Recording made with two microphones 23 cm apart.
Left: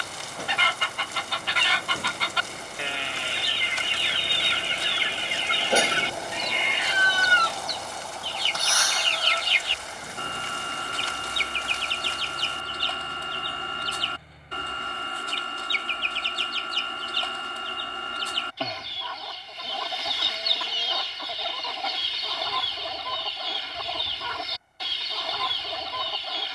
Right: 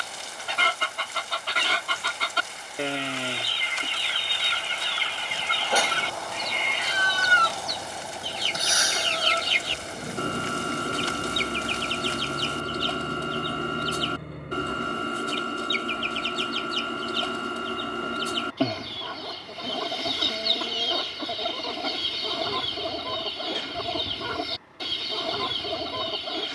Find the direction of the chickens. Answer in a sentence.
In this clip you hear the chickens on the right.